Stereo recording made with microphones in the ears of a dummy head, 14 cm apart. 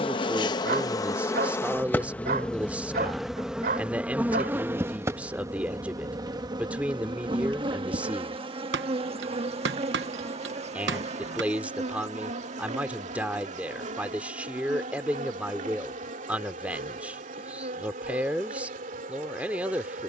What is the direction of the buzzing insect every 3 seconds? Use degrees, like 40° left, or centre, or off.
20° left, 10° right, 30° right, 40° right, 50° right, 50° right, 50° right.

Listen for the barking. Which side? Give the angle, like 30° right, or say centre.
60° right.